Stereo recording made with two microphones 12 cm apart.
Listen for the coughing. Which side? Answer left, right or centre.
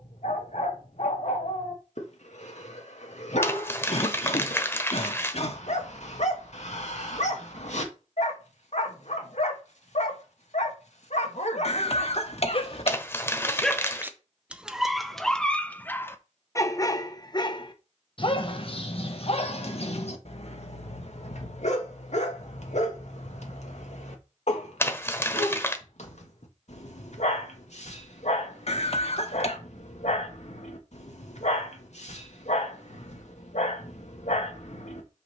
left.